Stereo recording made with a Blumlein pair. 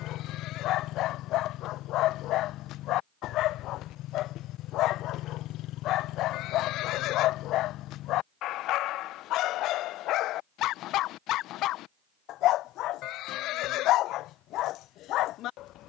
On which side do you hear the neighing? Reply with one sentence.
In this clip you hear the neighing on the left.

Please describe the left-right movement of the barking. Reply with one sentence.
In this clip you hear the barking stay in one place.